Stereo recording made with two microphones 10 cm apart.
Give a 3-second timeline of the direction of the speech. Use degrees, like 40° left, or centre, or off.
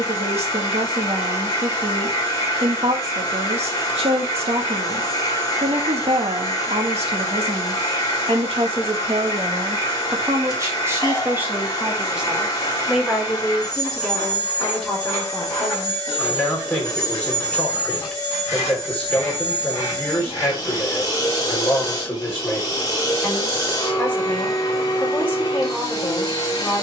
80° right, 80° right, 70° right, 30° right, centre, 10° left, 10° left, 10° left, 10° left.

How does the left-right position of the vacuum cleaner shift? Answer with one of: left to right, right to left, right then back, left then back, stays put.
stays put.